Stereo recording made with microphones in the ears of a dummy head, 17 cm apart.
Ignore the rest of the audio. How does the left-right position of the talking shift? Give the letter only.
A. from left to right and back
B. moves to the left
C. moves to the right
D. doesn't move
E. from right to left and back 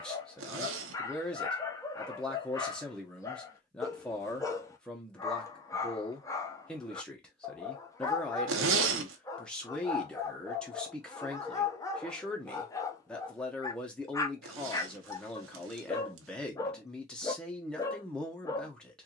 D.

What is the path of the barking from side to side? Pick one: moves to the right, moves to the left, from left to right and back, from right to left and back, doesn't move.
doesn't move.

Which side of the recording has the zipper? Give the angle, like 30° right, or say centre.
70° right.